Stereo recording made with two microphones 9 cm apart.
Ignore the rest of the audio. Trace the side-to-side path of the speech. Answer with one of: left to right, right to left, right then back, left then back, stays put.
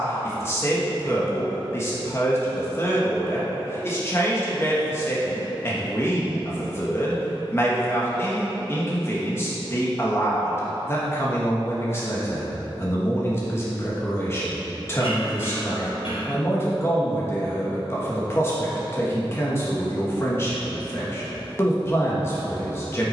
stays put.